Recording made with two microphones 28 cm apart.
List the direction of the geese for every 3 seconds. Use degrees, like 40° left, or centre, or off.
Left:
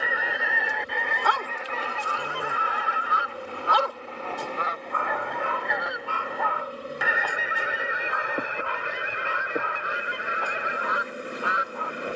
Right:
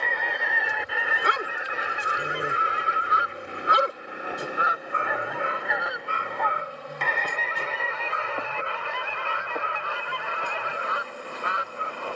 10° right, 10° right, 10° left, 20° left.